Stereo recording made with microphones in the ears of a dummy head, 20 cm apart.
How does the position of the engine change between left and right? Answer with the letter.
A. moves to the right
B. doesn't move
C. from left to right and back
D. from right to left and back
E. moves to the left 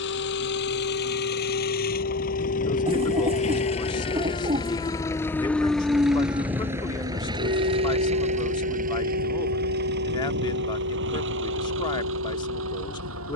A.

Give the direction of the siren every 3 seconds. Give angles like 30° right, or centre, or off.
60° left, 30° left, 40° right, 80° right, 80° right.